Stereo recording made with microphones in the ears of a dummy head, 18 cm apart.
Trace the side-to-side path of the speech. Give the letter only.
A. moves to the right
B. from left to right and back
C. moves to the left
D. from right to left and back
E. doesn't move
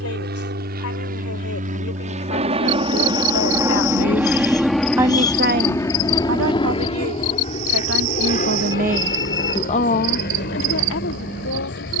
B.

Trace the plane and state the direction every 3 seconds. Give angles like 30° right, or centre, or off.
40° right, centre, 30° left, 50° left.